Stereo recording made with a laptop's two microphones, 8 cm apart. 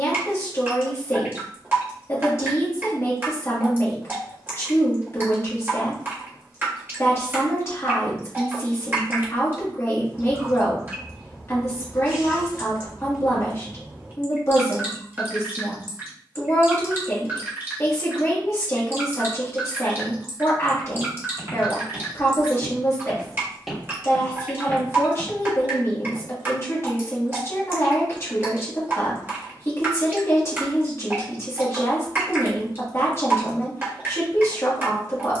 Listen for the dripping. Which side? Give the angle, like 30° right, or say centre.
30° right.